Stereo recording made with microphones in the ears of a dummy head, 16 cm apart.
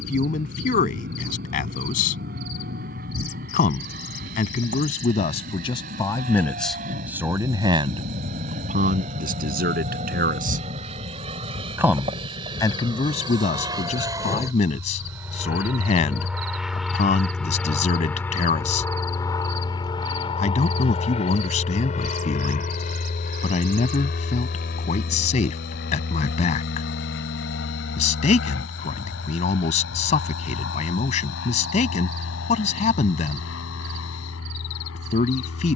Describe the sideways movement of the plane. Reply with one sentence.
You can hear the plane move from right to left.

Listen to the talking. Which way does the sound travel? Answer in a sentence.
You can hear the talking go right and come back.